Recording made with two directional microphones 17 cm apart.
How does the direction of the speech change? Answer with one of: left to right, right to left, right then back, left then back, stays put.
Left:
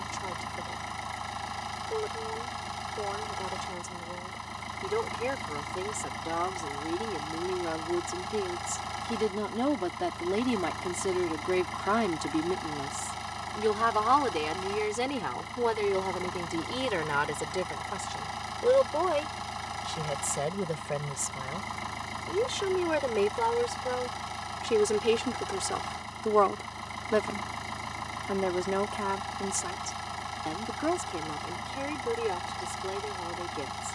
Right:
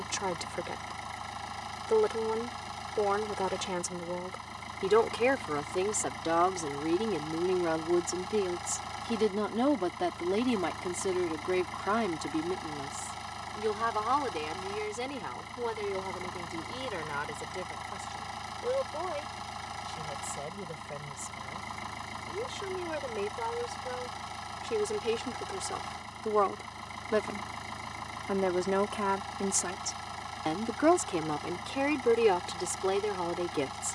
left then back.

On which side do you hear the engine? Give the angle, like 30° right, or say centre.
20° left.